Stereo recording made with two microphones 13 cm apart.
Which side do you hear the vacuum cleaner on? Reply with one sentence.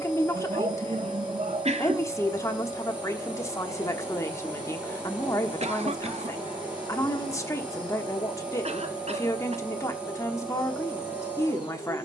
In this clip you hear the vacuum cleaner in the centre.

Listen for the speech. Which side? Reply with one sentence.
You can hear the speech on the left.